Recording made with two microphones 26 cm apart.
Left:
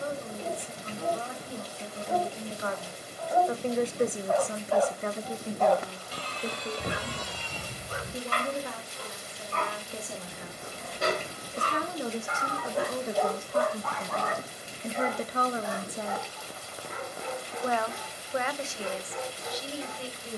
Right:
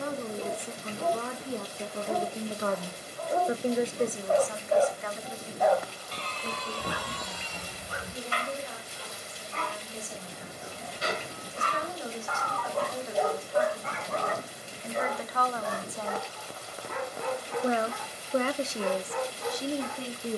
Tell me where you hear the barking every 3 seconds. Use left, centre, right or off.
right, right, left, left, centre, right, right.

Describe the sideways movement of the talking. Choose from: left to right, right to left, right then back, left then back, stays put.
left then back.